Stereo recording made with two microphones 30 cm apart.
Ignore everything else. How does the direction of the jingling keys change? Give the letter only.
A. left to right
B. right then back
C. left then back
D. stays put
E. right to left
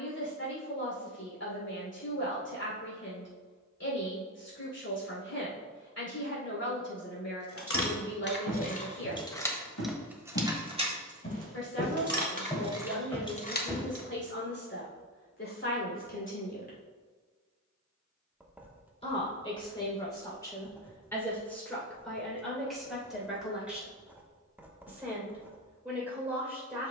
B.